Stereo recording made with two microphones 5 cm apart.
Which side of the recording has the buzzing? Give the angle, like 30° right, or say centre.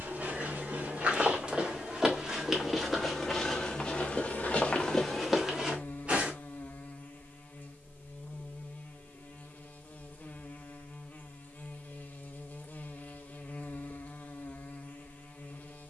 40° left.